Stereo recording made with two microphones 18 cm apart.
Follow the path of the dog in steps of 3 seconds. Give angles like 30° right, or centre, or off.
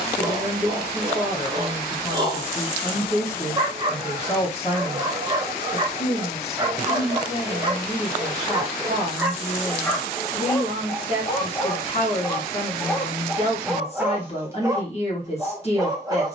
30° right, 30° right, 20° right, 20° left, centre, 20° right.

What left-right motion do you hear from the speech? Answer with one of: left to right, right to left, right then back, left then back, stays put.
stays put.